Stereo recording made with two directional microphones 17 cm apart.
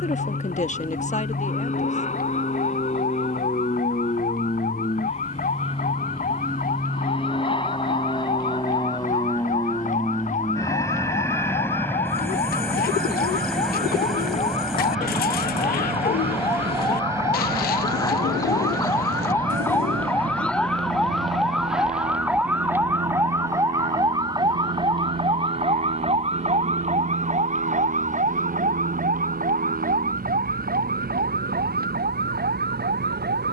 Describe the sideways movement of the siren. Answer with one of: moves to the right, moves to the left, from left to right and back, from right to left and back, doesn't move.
moves to the right.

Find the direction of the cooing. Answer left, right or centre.
left.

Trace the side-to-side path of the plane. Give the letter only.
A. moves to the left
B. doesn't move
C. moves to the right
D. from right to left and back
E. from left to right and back
C.